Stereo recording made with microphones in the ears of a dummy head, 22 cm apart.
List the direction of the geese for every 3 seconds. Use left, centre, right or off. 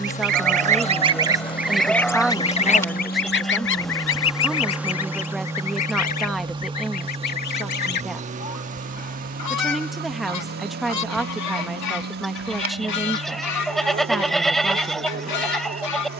centre, left, left, left, left, left.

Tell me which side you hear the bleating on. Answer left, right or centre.
centre.